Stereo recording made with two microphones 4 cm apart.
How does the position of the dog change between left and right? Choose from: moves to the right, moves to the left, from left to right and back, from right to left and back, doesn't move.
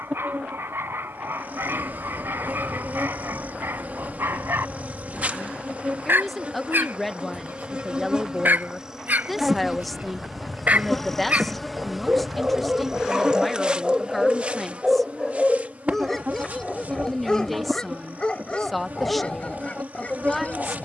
moves to the left.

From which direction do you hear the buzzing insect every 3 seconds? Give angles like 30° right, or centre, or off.
50° right, 40° right, 30° right, centre, 20° right, 40° right, 40° right.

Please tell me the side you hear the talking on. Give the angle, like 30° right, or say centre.
centre.